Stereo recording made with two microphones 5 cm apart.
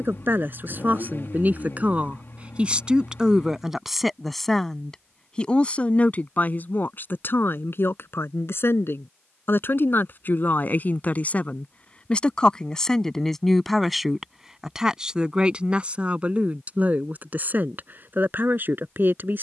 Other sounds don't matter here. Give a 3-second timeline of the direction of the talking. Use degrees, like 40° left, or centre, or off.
30° right, centre, 50° left, 40° left, 10° left, 30° right, 40° right.